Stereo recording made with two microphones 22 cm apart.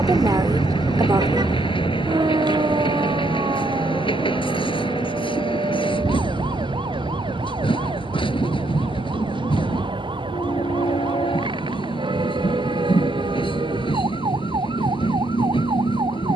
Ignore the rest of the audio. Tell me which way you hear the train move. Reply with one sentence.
In this clip you hear the train stay in one place.